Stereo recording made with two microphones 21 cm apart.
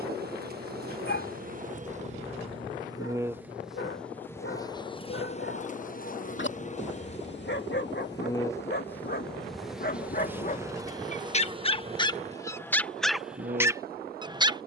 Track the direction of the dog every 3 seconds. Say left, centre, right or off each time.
left, left, left, left, centre.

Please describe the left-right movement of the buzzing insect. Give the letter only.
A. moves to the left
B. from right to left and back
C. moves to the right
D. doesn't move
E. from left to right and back
B.